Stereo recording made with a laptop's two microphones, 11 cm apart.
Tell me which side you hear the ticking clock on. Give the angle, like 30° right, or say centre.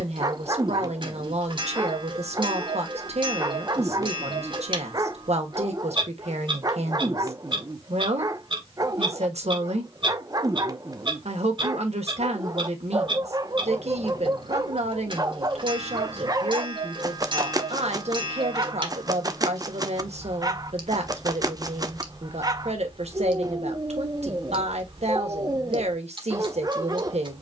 50° right.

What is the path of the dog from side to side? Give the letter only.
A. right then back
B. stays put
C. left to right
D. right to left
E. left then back
B.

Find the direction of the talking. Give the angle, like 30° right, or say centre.
80° right.